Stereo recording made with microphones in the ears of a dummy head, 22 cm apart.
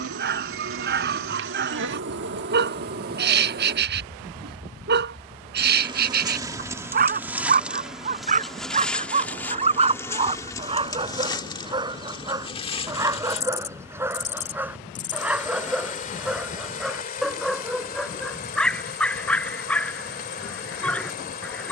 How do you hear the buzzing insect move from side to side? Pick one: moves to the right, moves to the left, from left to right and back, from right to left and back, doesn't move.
moves to the left.